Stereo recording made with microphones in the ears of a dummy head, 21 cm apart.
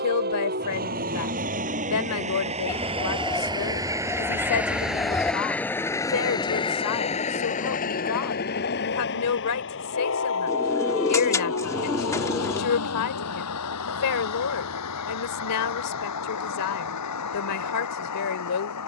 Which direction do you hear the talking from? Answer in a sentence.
You can hear the talking on the left.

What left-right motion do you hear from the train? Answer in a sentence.
In this clip you hear the train travel towards the left.